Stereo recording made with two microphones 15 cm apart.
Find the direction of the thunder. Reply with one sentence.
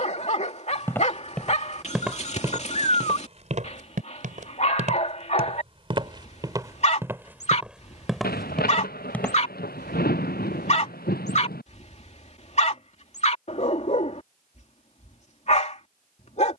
In this clip you hear the thunder on the left.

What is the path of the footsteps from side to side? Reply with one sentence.
You can hear the footsteps move from left to right and back again.